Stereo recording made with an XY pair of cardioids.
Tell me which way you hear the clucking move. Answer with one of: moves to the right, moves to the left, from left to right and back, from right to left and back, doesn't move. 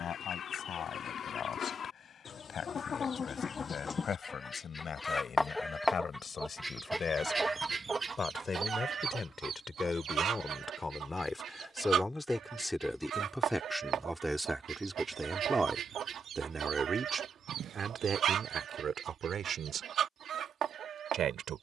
moves to the right.